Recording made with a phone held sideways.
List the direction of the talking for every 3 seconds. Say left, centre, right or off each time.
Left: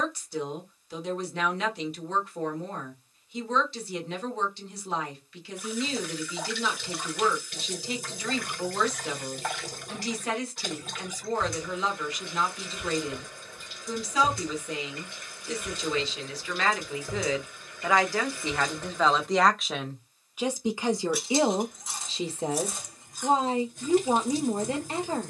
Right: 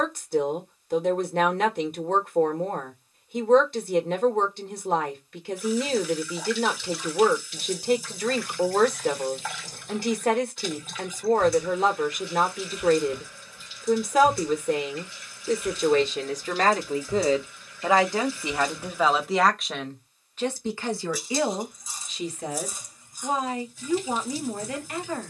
right, right, right, right, right, right, centre, left, left.